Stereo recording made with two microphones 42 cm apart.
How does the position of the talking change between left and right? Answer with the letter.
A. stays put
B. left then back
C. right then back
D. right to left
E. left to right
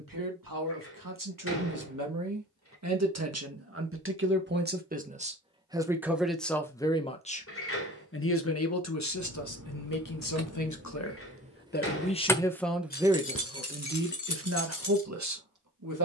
B.